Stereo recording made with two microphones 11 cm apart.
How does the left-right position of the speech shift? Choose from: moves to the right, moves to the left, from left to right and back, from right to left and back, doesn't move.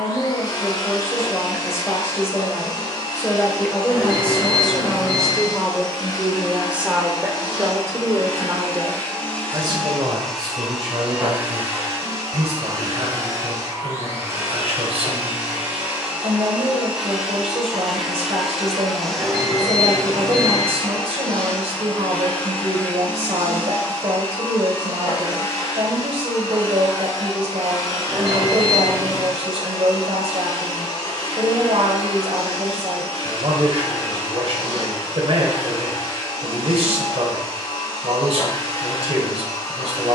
moves to the right.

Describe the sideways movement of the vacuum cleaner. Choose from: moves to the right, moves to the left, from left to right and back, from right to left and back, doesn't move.
from left to right and back.